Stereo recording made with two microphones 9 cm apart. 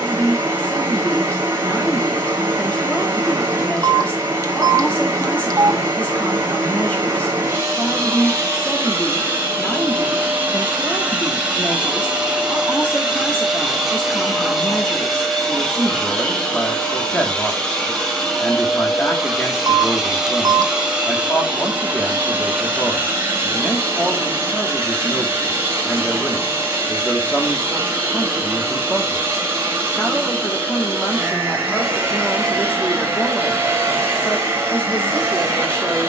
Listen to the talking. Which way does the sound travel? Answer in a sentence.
In this clip you hear the talking stay in one place.